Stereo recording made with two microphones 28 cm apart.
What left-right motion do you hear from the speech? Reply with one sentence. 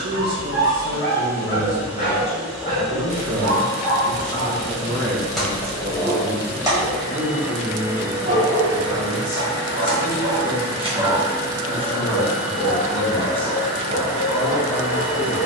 You can hear the speech go from the right side to the left.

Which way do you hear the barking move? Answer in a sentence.
You can hear the barking move from left to right and back again.